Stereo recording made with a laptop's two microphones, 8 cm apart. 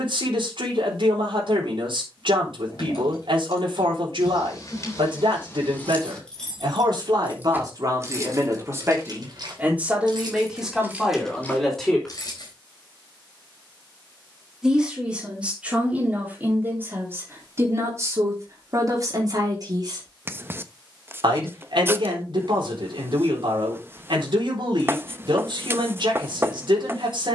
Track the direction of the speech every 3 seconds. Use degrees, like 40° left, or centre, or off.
80° right, 70° right, 50° right, 10° right, centre, 20° right, 40° right, 70° right, 70° right.